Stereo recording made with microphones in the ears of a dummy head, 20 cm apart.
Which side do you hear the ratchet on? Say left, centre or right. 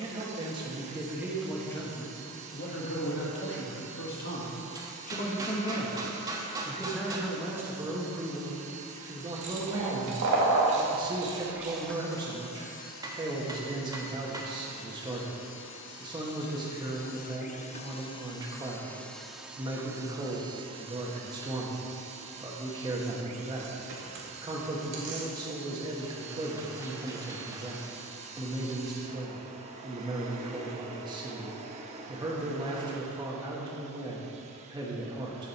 right.